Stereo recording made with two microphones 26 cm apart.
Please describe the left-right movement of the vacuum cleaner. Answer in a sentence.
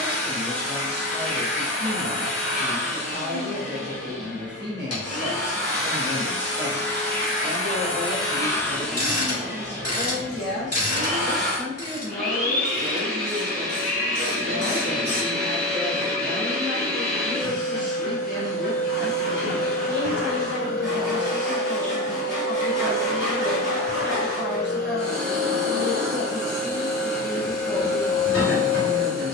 You can hear the vacuum cleaner travel towards the right.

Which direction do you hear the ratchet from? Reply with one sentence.
In this clip you hear the ratchet on the left.